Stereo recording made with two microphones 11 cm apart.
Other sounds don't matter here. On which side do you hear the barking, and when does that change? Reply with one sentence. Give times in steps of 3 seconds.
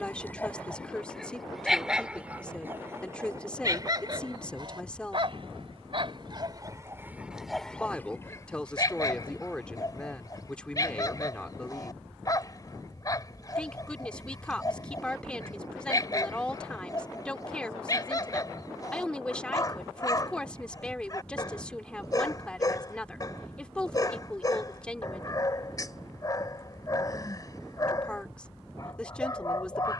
In this clip you hear the barking in the centre from 0 s, on the right from 3 s, in the centre from 6 s and on the left from 9 s.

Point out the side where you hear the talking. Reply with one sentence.
You can hear the talking in the centre.